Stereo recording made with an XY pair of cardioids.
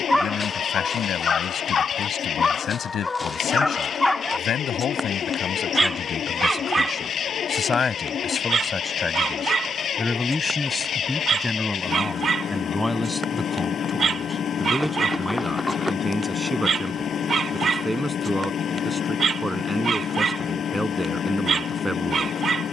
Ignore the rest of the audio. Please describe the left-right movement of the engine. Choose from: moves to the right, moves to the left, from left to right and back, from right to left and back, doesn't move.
doesn't move.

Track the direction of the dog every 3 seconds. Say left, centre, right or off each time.
left, centre, right, right, right, right, right, right.